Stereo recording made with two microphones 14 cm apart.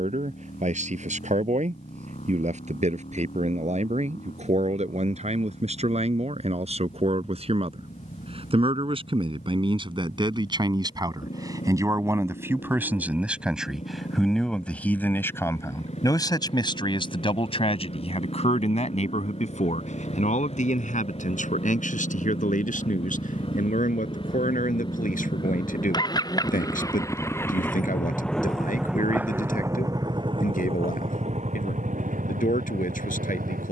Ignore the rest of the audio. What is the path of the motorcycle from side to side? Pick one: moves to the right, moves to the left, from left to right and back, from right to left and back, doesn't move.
moves to the right.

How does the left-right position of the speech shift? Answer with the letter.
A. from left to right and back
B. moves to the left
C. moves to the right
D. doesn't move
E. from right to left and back
B.